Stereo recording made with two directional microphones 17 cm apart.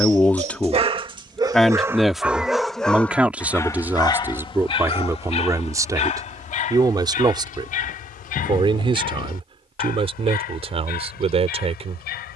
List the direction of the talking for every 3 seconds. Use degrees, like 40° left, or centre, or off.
centre, 10° right, 30° right, 30° right.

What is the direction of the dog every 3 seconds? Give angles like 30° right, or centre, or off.
20° right, 30° left, 50° left, 60° left.